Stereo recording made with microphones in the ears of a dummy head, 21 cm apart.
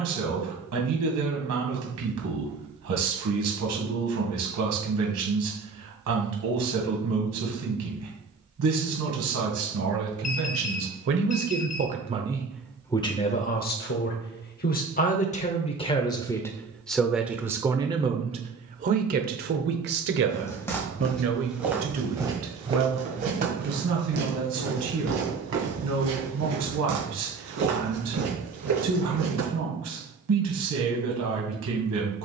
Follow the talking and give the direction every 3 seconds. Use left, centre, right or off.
right, right, right, right, left, centre, right, right, right, right, right.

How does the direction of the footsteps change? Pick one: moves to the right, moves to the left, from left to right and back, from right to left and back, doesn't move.
moves to the right.